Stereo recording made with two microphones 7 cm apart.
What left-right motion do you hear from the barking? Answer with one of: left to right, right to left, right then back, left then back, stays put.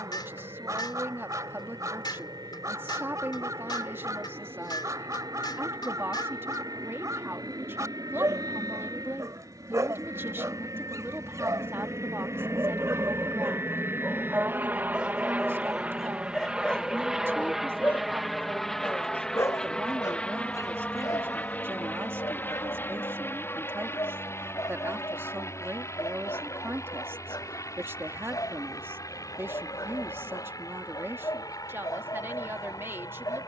right to left.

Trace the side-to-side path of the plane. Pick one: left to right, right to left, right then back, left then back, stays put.
right to left.